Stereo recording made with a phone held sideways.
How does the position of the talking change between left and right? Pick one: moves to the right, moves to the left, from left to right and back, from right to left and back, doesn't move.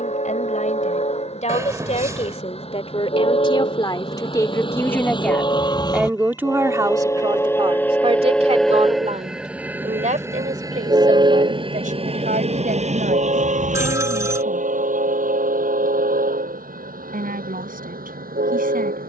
moves to the right.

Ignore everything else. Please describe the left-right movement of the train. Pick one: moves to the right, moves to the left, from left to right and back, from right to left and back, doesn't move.
moves to the right.